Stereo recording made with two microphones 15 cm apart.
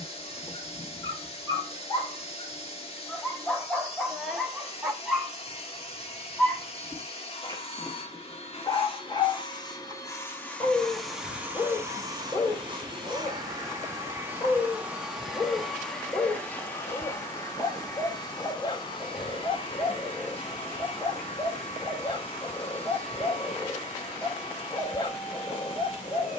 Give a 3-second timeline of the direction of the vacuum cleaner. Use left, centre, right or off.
left, left, left, centre, right, centre, left, left, left.